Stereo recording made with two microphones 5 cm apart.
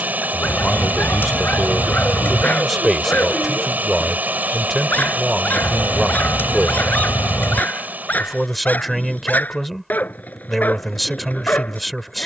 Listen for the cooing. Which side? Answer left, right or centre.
left.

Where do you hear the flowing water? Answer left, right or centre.
right.